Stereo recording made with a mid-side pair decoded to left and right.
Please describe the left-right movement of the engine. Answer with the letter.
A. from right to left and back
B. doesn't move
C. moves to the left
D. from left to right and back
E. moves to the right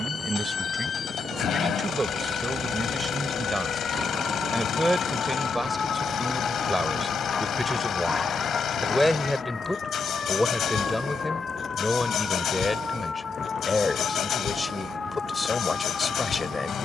B.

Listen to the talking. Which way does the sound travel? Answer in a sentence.
You can hear the talking travel towards the left.